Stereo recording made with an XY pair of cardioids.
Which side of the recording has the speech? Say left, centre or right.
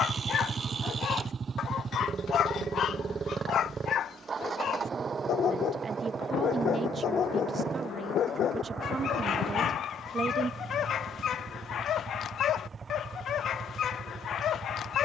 right.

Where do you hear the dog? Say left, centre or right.
left.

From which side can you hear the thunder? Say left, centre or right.
left.